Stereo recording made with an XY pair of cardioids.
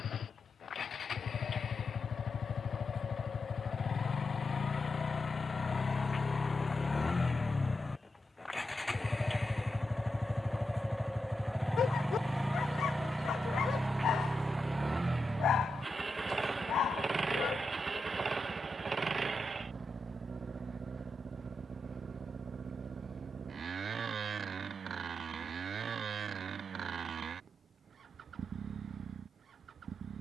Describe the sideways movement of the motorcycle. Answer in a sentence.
You can hear the motorcycle go from the left side to the right.